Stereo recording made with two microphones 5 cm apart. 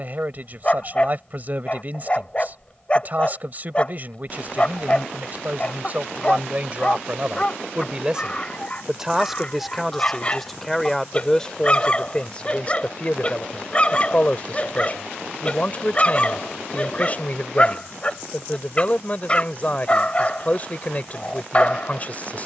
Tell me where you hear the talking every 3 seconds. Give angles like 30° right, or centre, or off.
40° right, 40° right, 20° right, 10° left, 30° left, 40° left, 40° left, 40° left.